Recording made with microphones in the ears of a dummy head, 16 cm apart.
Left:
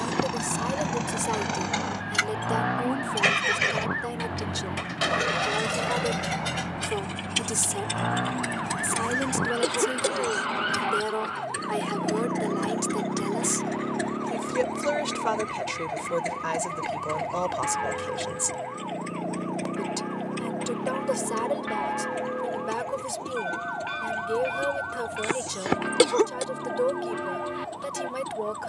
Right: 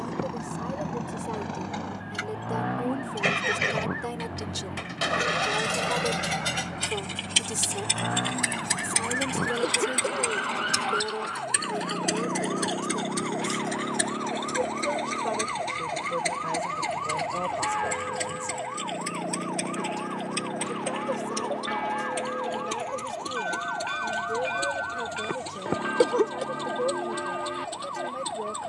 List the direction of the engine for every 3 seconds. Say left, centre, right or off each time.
left, centre, right, right, right, right, right, right, right, right.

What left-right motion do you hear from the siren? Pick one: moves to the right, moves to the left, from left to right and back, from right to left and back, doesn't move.
moves to the right.